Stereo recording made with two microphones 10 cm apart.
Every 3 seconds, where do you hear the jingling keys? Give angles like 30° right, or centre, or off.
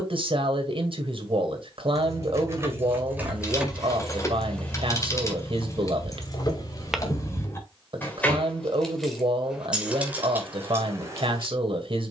30° right, 10° left, 30° left, 20° right.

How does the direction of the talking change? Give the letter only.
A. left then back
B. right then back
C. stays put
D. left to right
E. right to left
C.